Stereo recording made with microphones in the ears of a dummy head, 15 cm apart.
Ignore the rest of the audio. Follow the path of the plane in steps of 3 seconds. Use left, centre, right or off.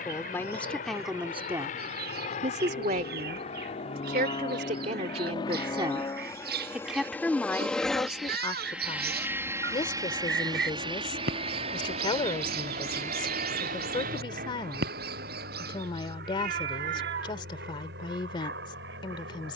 left, left, centre, right, right, right, right.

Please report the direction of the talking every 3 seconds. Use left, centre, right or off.
centre, right, centre, left, left, left, left.